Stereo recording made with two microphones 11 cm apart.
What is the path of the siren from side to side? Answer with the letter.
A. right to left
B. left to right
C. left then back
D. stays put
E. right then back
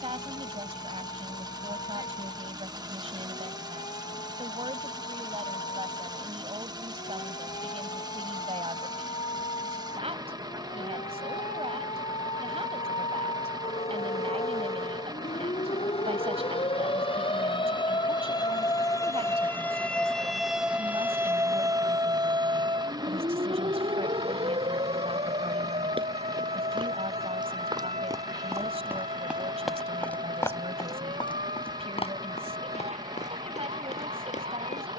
B.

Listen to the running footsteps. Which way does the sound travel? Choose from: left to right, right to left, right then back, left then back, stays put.
right to left.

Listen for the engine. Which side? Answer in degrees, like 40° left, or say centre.
40° right.